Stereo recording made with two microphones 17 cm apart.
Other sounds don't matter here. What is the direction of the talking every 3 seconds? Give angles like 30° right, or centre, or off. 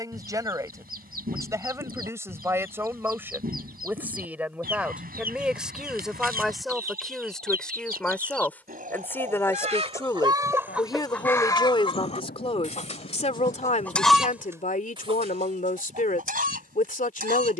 20° right, 10° right, centre, 20° left, 40° left, 50° left.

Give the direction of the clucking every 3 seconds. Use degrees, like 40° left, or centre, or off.
60° right, 60° right, 60° right, 10° right, 20° left, 50° right.